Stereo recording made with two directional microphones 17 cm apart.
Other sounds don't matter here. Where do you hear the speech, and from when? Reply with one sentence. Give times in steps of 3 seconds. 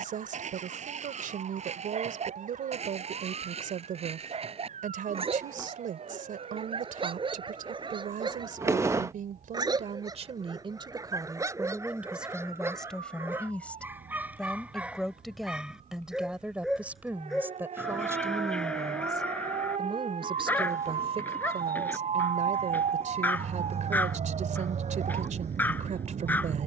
In this clip you hear the speech on the right from 0 s, in the centre from 12 s and on the right from 18 s.